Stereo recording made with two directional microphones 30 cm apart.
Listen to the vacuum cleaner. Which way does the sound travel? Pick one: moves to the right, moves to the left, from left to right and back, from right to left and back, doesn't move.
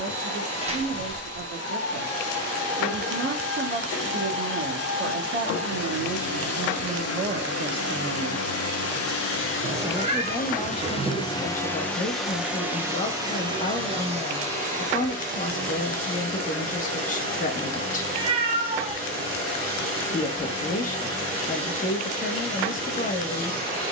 moves to the right.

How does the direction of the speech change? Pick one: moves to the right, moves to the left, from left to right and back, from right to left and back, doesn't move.
moves to the left.